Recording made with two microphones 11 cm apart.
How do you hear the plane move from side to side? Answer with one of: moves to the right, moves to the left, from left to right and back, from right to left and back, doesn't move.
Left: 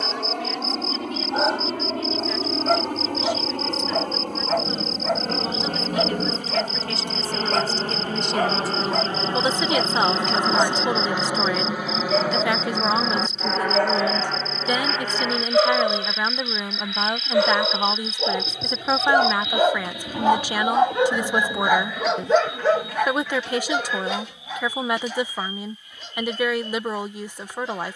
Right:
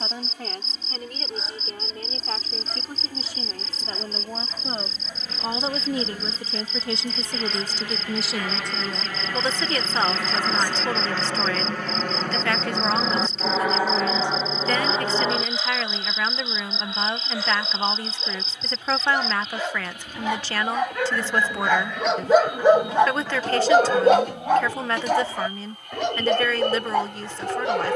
moves to the right.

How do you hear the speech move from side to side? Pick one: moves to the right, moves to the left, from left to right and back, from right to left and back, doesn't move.
moves to the left.